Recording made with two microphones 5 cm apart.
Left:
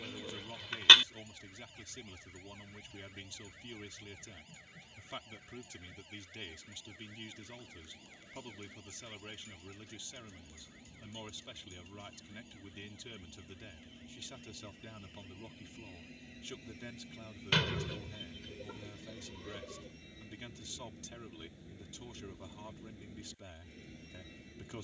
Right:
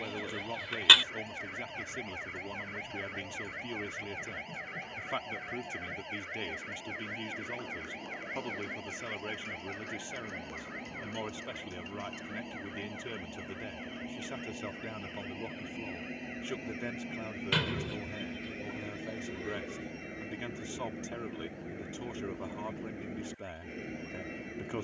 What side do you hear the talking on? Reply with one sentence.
In this clip you hear the talking on the right.